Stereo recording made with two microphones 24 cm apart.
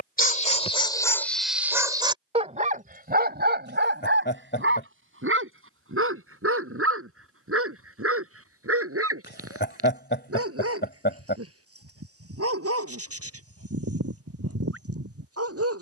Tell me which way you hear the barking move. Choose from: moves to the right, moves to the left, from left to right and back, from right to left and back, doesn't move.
moves to the right.